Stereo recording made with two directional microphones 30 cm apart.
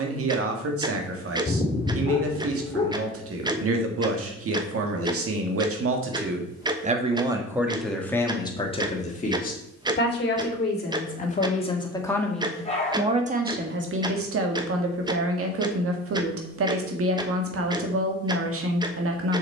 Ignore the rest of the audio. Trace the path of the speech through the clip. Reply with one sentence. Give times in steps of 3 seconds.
You can hear the speech on the right from 0 s, in the centre from 6 s, on the left from 9 s and on the right from 12 s.